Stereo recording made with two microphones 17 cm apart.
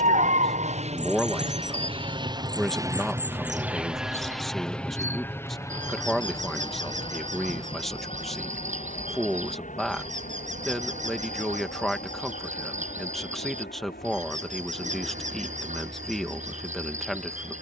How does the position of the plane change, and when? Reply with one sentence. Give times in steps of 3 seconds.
In this clip you hear the plane on the right from 0 s, in the centre from 3 s and on the left from 6 s.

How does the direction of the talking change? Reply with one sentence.
You can hear the talking stay put.